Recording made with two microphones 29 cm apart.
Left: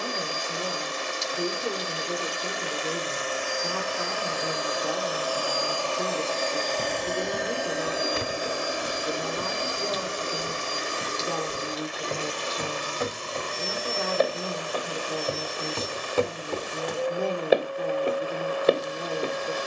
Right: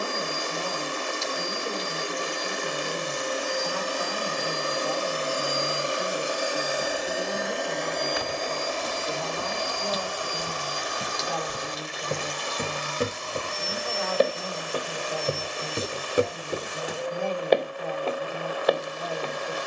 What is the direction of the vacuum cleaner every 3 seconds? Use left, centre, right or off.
right, right, centre, left, left, left, left.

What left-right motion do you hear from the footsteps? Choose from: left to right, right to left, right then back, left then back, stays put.
right then back.